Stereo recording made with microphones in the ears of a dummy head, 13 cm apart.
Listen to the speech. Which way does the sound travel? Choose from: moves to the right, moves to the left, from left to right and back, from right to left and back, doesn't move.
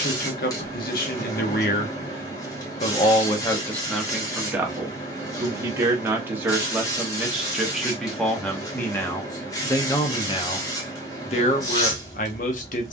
from left to right and back.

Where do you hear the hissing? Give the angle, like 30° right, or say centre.
20° left.